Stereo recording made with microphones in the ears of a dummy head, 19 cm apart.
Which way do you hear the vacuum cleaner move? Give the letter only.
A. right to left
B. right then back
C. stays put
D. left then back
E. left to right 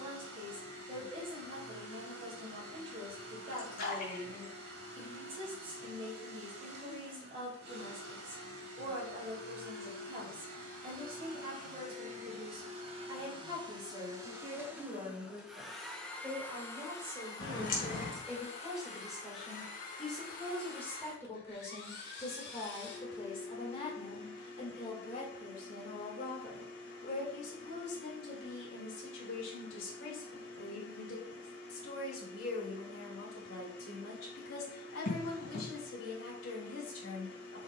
A.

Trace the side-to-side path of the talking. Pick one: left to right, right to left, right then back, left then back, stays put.
right to left.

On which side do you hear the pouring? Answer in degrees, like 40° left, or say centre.
40° left.